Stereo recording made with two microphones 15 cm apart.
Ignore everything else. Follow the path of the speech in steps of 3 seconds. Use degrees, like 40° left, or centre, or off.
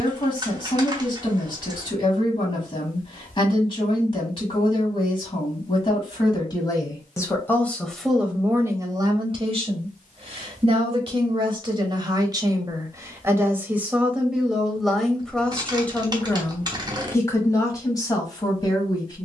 40° left, 40° left, 10° left, 40° right, 10° right, 10° left, 30° left.